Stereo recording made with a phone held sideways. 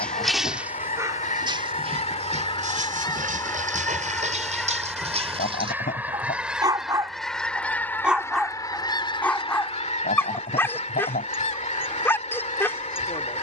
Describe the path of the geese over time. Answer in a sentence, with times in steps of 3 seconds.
In this clip you hear the geese on the left from 0 s, in the centre from 3 s and on the left from 9 s.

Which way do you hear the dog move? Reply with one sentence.
You can hear the dog go right and come back.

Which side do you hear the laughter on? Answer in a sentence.
You can hear the laughter on the left.